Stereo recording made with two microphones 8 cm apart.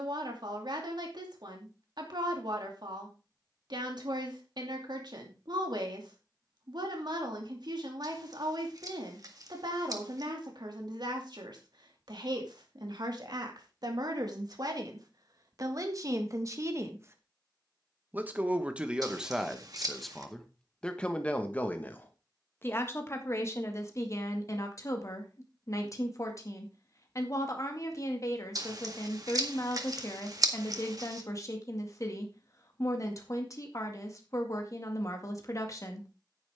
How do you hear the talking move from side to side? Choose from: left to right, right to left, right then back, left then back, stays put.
right to left.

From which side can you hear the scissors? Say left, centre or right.
right.